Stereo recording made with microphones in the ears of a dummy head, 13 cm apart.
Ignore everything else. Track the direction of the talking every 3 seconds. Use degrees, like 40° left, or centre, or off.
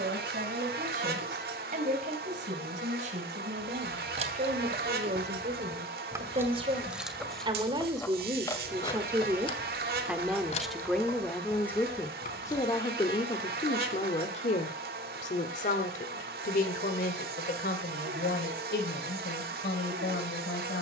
50° right, 50° right, 30° right, centre, 30° left, 60° left, 70° left.